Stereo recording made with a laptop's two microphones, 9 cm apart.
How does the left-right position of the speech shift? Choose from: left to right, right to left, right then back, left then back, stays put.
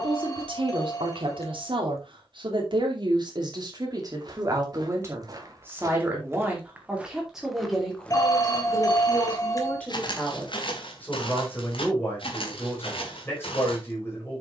right to left.